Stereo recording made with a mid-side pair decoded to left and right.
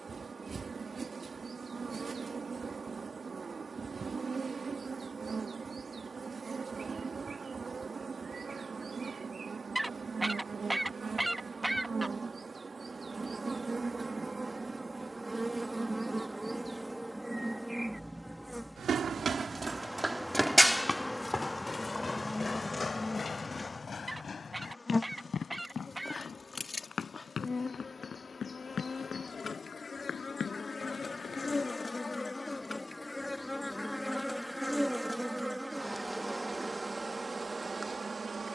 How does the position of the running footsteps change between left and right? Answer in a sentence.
You can hear the running footsteps travel towards the left.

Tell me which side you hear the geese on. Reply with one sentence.
You can hear the geese in the centre.